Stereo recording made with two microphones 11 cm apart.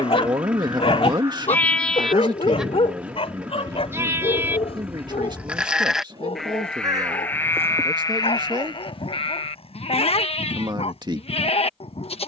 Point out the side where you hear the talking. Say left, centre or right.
right.